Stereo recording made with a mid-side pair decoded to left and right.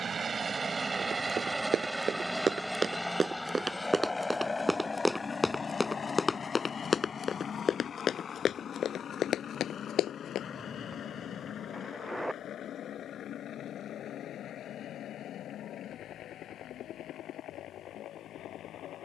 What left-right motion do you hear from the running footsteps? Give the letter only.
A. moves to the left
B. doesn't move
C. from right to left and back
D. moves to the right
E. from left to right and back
A.